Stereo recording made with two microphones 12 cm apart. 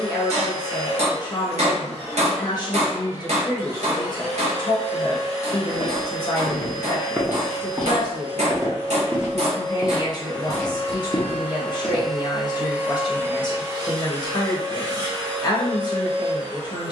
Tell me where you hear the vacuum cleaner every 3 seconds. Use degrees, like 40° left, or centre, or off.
60° left, 60° left, 50° left, 30° left, 20° right, 50° right.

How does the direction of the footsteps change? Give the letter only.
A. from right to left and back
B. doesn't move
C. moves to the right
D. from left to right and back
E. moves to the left
D.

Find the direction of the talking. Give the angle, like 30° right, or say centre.
40° left.